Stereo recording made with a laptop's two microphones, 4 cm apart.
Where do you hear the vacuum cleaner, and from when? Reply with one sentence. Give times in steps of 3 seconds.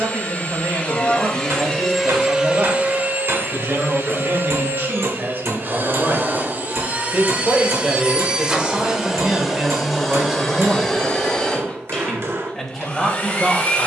In this clip you hear the vacuum cleaner in the centre from 0 s, on the right from 3 s, in the centre from 9 s and on the left from 12 s.